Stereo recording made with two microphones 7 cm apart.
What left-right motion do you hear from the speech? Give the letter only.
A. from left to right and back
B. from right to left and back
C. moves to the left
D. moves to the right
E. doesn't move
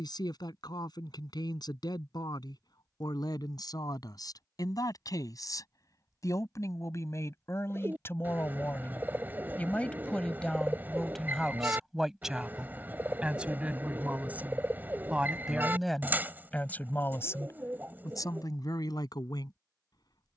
A.